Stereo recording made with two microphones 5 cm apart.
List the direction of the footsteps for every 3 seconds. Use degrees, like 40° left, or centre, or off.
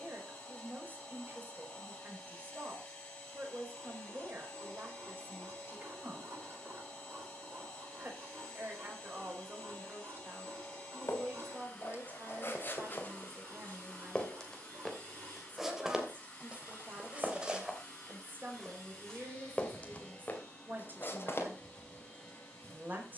off, off, off, 50° left, 30° left, 10° right, 20° left, 50° left.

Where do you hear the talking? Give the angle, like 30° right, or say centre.
40° right.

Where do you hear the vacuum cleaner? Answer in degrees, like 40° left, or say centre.
20° left.